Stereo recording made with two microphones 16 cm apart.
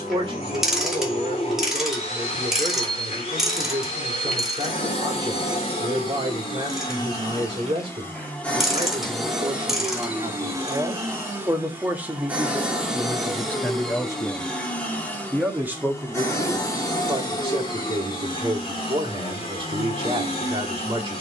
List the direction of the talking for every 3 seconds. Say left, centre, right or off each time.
right, right, right, right, centre, right, right.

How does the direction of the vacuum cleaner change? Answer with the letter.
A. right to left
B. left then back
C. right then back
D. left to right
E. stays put
C.